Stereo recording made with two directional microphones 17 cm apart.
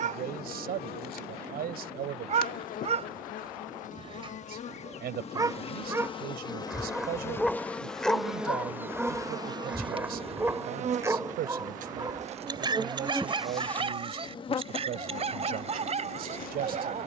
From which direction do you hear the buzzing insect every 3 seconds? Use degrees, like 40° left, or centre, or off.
60° left, 40° left, 10° left, 40° right, centre, 50° left.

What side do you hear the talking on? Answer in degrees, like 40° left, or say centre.
60° right.